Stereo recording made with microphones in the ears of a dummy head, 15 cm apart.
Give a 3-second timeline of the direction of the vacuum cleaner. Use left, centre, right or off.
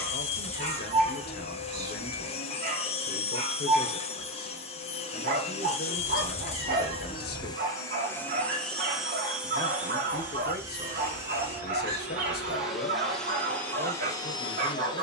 left, left, left, centre, centre.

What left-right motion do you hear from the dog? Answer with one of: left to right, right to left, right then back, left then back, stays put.
stays put.